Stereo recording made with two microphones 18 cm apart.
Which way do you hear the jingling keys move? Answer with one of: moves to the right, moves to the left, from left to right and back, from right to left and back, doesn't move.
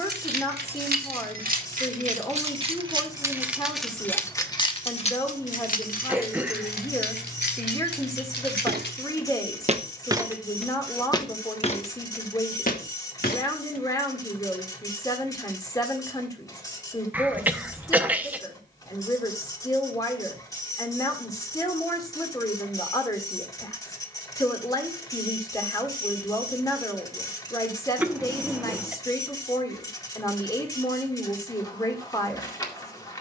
moves to the left.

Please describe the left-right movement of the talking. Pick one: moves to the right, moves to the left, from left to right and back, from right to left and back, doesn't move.
doesn't move.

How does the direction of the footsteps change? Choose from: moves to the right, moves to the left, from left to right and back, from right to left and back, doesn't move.
moves to the left.